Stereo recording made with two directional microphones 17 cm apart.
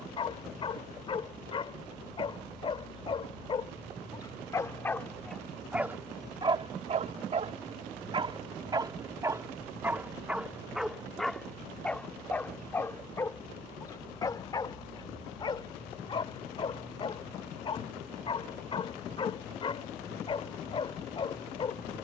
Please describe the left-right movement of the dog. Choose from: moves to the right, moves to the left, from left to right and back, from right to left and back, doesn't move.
from left to right and back.